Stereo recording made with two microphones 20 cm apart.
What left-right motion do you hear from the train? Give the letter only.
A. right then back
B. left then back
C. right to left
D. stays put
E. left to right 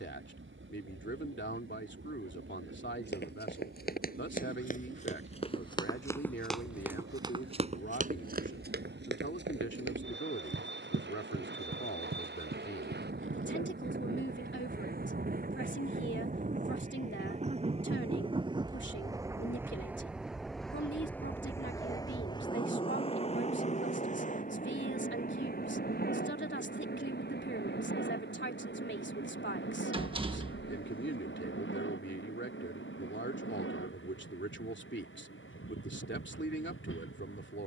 C.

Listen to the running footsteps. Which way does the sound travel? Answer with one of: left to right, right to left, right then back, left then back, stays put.
left to right.